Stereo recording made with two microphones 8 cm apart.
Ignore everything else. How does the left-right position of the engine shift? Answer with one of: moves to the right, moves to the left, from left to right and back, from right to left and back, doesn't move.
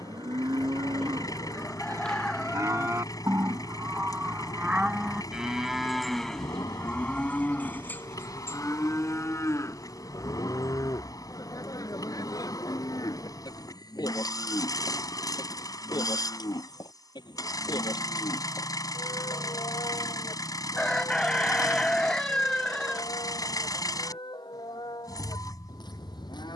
doesn't move.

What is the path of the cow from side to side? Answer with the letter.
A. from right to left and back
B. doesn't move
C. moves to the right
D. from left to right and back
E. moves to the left
E.